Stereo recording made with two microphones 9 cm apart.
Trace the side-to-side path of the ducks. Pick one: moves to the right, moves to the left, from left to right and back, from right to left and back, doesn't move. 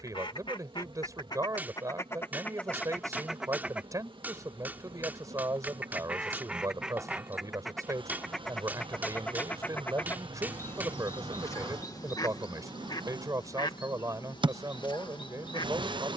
from left to right and back.